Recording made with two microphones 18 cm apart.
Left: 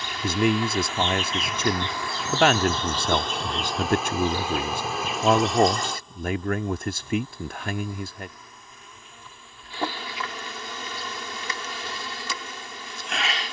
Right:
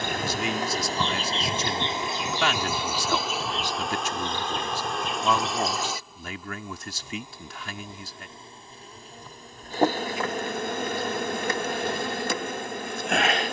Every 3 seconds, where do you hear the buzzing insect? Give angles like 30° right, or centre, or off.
30° right, centre, 20° right, 50° right, 50° right.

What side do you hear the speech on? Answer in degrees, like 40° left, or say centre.
50° left.